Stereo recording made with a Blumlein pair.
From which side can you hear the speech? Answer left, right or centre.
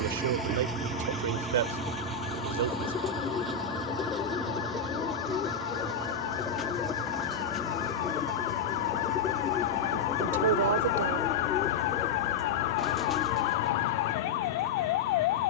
right.